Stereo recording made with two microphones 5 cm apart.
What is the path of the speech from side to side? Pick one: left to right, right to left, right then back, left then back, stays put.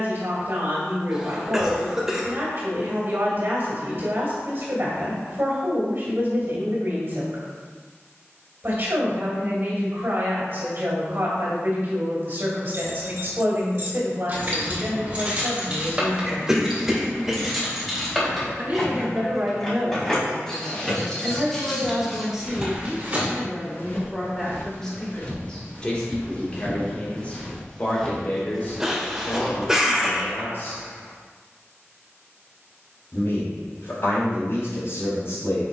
right to left.